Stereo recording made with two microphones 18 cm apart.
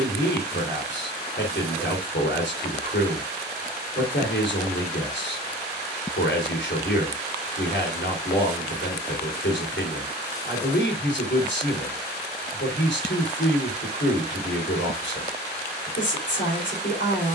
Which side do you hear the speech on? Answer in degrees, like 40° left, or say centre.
80° left.